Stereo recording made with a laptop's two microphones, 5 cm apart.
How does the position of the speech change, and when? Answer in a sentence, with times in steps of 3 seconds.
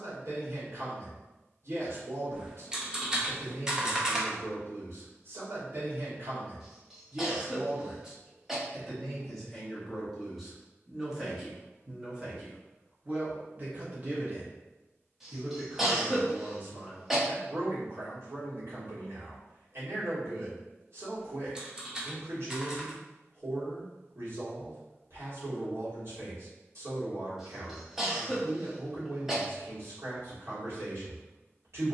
You can hear the speech on the right from 0 s, in the centre from 9 s and on the right from 12 s.